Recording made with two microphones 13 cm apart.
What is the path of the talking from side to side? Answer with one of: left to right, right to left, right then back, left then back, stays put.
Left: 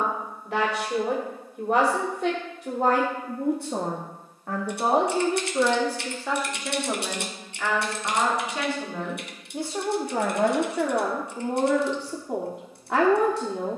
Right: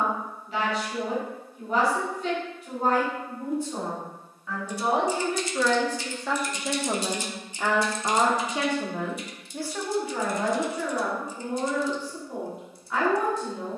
right then back.